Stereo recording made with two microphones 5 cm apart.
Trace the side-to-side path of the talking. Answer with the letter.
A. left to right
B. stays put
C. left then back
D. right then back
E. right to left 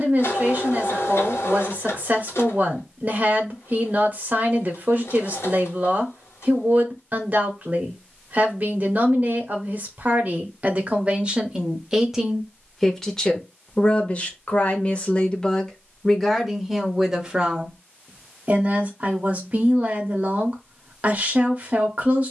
C.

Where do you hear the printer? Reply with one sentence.
You can hear the printer on the left.